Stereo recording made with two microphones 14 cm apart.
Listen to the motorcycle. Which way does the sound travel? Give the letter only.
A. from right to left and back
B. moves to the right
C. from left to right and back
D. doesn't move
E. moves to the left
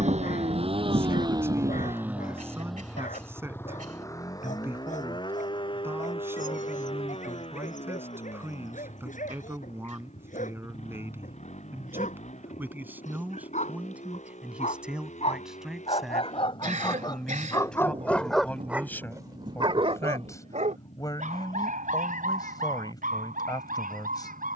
E.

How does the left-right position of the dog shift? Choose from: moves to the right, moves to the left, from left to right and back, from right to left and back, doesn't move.
moves to the right.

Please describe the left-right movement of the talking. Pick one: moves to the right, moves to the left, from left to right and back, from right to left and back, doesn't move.
moves to the left.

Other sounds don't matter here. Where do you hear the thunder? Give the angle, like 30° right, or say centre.
50° right.